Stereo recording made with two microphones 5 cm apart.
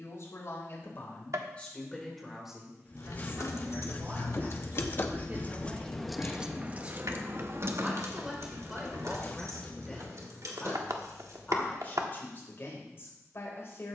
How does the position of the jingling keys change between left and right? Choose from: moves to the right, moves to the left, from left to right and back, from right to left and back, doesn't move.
moves to the right.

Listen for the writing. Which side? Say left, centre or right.
left.